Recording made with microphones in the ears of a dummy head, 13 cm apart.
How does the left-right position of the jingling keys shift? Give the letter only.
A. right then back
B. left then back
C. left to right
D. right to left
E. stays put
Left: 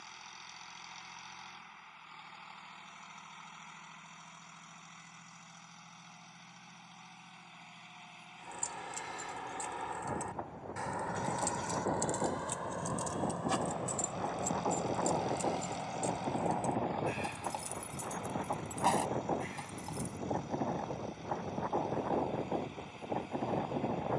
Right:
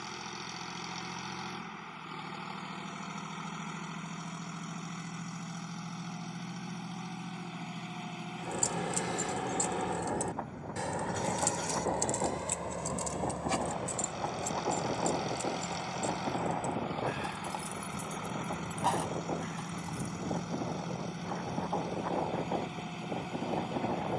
D.